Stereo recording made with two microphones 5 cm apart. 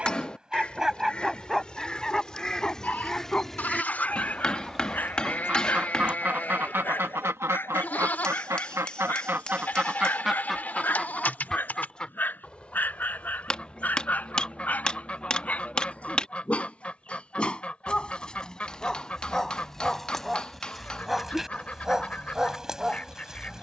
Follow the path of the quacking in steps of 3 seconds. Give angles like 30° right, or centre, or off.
20° left, centre, 60° right, 10° right, 30° left, 30° left, 30° left, 30° left.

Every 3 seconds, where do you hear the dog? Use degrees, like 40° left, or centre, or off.
centre, 30° left, 50° left, 40° left, 40° left, 30° left, 10° left, 10° right.